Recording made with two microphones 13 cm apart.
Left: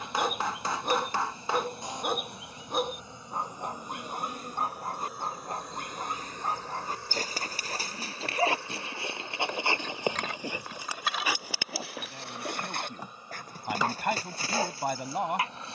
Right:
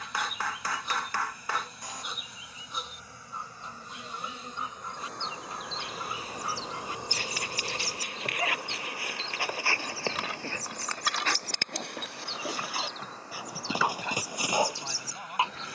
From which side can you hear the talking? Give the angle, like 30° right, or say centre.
60° left.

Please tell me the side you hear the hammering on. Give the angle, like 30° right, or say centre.
20° left.